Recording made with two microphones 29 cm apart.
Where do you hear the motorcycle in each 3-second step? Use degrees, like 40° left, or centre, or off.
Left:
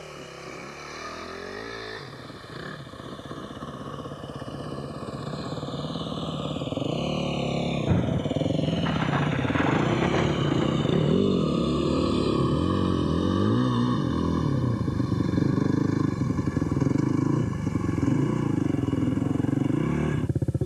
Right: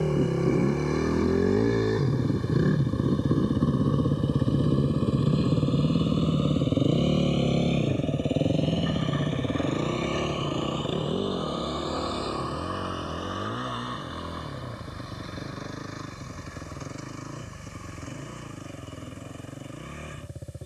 60° right, 40° right, 20° right, 20° left, 50° left, 60° left, 70° left.